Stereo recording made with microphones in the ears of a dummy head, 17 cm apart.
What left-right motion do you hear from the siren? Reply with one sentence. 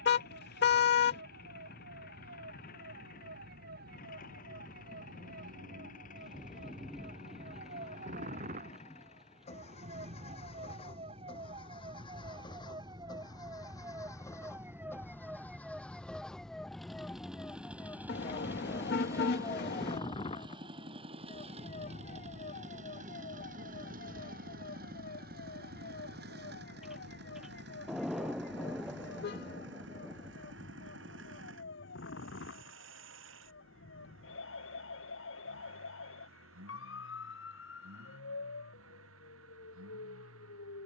In this clip you hear the siren go from the right side to the left.